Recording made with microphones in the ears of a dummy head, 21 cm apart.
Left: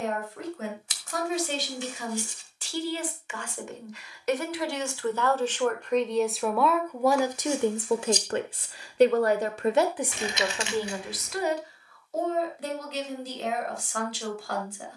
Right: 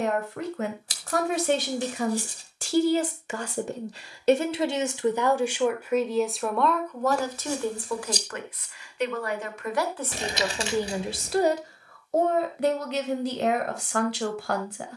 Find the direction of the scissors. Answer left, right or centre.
right.